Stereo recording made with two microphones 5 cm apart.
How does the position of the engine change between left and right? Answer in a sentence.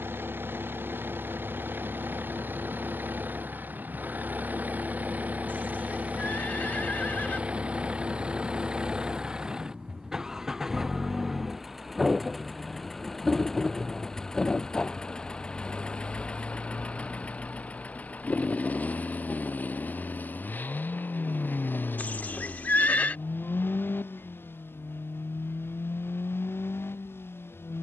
You can hear the engine go from the right side to the left.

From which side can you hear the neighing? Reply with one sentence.
In this clip you hear the neighing on the left.